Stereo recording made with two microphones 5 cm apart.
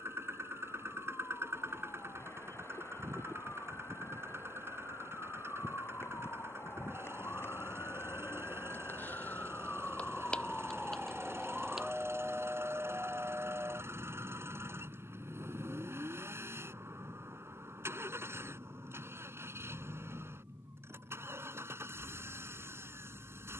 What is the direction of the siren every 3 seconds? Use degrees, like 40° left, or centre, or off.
80° left, 70° left, 60° left, 20° left, 40° right, 60° right, 70° right, 70° right.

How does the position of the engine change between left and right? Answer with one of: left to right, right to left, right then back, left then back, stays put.
stays put.